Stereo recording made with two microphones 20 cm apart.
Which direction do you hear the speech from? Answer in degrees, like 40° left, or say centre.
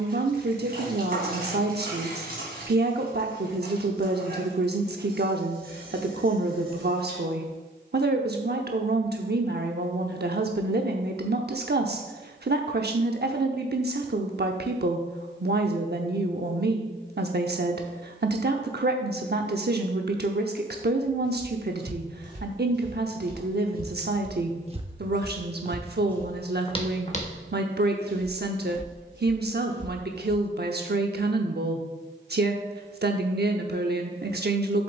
50° right.